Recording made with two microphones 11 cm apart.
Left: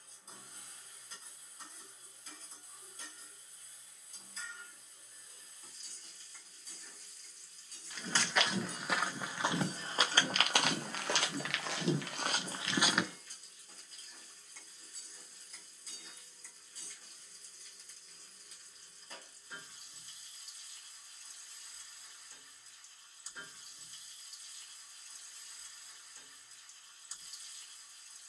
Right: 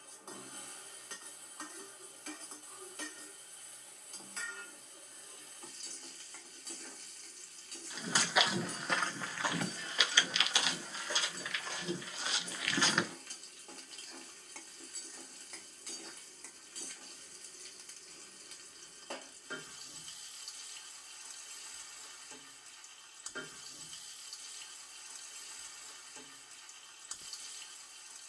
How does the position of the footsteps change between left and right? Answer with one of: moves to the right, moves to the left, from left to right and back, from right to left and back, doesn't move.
from right to left and back.